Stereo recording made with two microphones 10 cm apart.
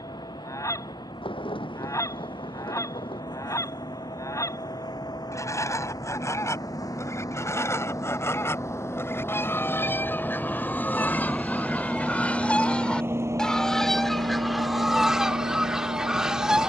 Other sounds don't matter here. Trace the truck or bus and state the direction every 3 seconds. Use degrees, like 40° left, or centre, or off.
50° left, 50° left, 40° left, 10° left, 30° right, 60° right.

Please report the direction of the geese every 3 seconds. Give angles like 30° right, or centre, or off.
30° left, 30° left, 30° left, 20° left, 10° left, 10° right.